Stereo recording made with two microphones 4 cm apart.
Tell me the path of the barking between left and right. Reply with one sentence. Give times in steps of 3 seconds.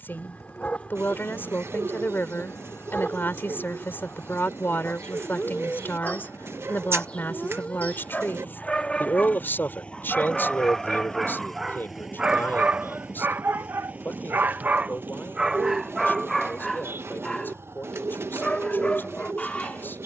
In this clip you hear the barking on the left from 0 s, in the centre from 9 s, on the right from 12 s, in the centre from 15 s and on the left from 18 s.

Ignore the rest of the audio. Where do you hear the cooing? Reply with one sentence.
You can hear the cooing on the right.